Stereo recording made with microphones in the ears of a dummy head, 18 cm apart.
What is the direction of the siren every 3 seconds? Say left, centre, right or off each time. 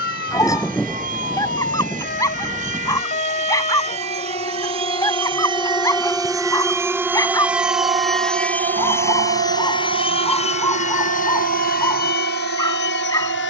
left, left, centre, right, right.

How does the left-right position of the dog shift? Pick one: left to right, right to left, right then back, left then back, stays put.
stays put.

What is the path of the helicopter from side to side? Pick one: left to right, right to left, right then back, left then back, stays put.
right to left.